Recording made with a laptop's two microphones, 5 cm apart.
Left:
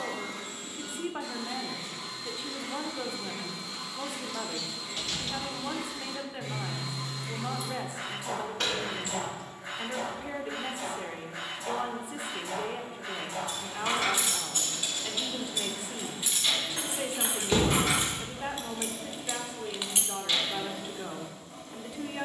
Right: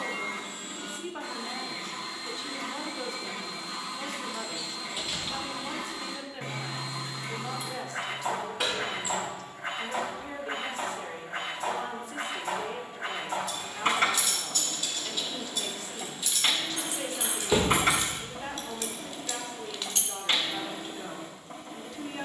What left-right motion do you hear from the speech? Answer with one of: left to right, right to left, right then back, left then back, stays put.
stays put.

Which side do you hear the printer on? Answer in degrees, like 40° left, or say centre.
40° right.